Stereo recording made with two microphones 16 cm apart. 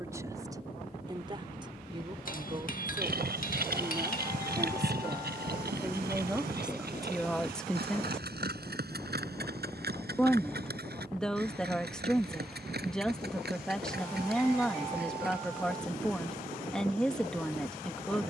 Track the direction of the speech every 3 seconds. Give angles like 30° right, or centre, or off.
30° right, 20° right, centre, 10° left, 10° left, 10° left.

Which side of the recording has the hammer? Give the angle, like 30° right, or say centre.
60° left.